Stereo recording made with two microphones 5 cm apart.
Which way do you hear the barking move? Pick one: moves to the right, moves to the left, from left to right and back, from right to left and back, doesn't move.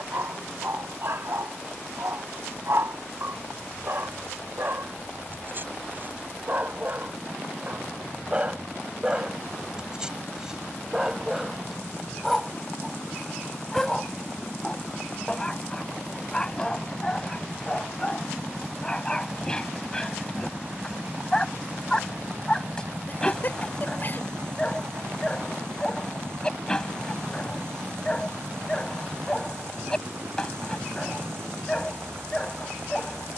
moves to the left.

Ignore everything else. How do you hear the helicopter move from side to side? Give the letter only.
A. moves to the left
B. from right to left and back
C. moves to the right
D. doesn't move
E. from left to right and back
C.